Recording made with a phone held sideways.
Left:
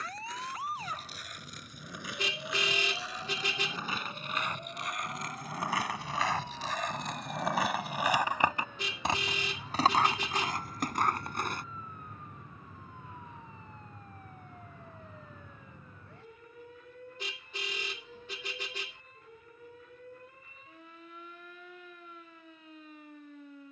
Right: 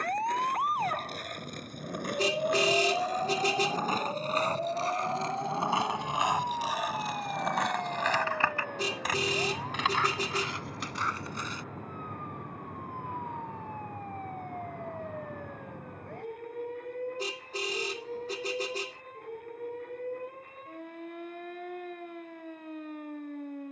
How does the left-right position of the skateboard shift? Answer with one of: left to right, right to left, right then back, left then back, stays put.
right to left.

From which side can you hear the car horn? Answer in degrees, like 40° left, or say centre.
40° right.